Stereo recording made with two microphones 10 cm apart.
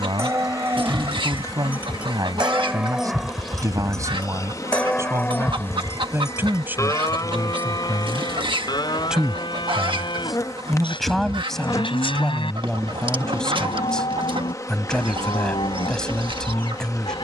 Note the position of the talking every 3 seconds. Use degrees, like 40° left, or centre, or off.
40° right, 30° right, 20° right, centre, 10° left, 10° left.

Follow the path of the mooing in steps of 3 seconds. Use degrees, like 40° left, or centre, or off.
20° right, 10° left, 40° left, 60° left, 70° left, 70° left.